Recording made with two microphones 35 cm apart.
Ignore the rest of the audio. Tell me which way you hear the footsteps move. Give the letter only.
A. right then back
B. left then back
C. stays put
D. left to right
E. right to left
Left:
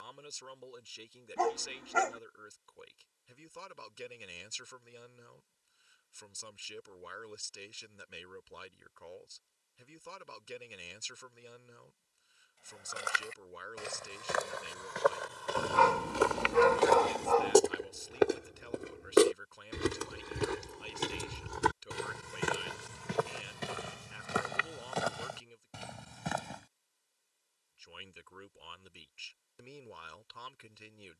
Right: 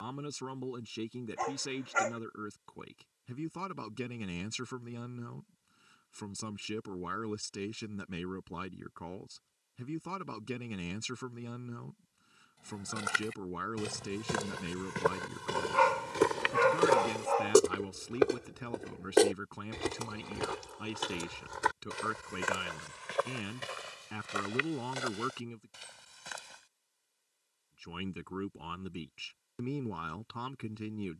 E.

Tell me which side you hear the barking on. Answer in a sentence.
You can hear the barking on the left.